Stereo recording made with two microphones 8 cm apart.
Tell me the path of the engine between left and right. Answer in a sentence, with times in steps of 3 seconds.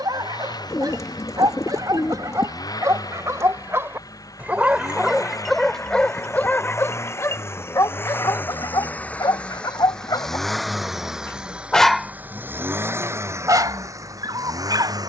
In this clip you hear the engine on the left from 0 s, in the centre from 9 s and on the right from 12 s.